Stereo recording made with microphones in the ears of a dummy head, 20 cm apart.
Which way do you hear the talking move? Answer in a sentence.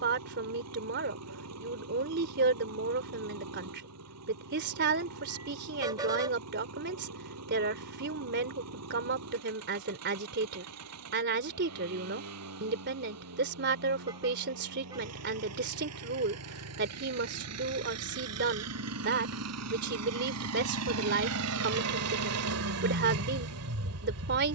You can hear the talking stay in one place.